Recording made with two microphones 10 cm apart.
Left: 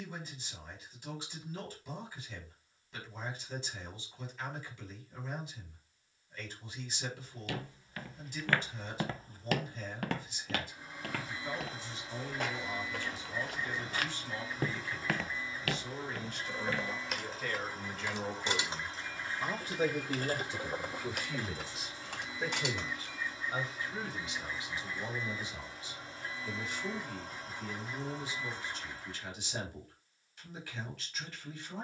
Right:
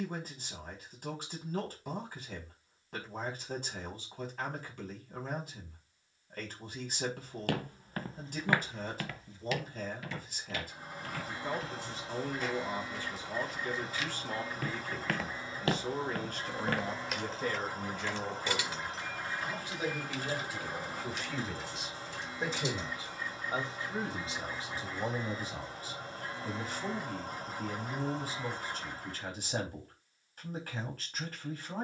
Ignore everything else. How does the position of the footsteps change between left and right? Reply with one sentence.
You can hear the footsteps move from right to left and back again.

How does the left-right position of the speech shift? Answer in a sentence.
In this clip you hear the speech move from right to left and back again.